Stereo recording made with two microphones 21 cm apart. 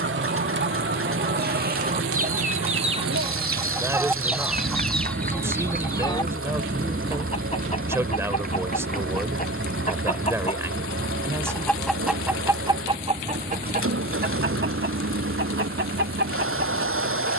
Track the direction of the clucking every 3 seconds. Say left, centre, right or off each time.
right, centre, left, left, right, right.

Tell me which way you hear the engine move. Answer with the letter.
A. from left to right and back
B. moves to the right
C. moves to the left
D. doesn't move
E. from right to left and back
D.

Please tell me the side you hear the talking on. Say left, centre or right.
centre.